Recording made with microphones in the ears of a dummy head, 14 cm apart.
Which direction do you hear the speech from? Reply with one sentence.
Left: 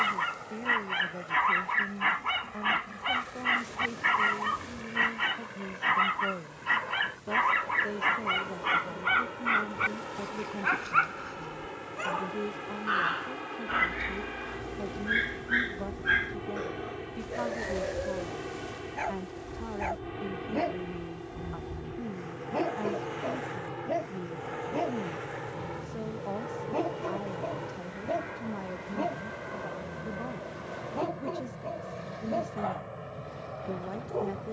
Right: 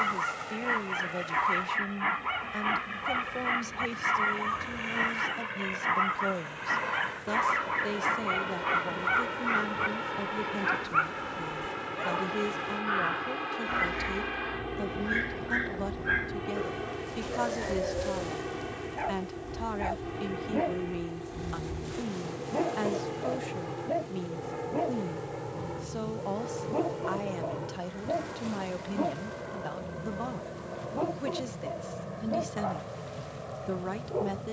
You can hear the speech on the right.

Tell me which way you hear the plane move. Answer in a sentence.
You can hear the plane move to the left.